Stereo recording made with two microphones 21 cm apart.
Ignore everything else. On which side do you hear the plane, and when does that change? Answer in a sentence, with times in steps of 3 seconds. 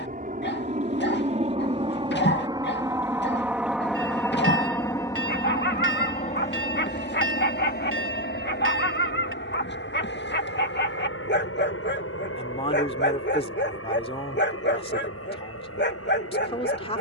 You can hear the plane on the right from 0 s, in the centre from 3 s and on the left from 6 s.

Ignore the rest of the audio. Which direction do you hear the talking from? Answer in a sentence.
You can hear the talking on the left.